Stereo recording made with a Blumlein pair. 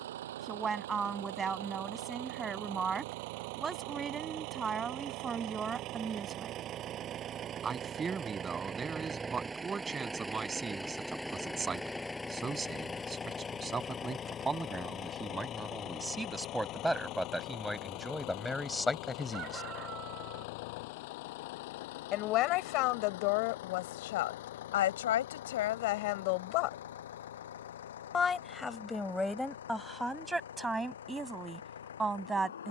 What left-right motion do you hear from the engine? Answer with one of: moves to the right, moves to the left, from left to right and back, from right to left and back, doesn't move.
moves to the left.